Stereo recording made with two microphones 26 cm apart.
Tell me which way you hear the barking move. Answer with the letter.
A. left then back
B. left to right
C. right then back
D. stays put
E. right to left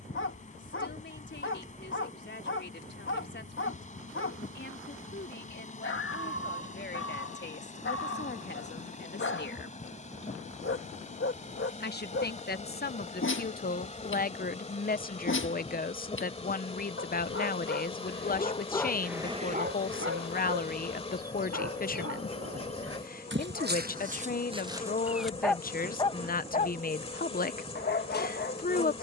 C.